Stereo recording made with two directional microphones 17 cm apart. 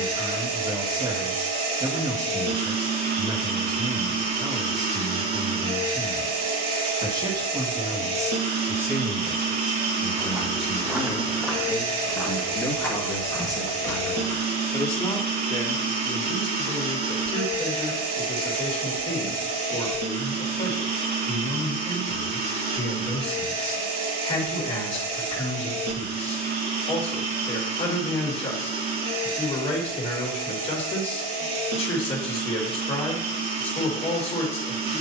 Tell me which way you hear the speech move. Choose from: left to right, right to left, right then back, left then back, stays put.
right to left.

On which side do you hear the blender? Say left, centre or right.
right.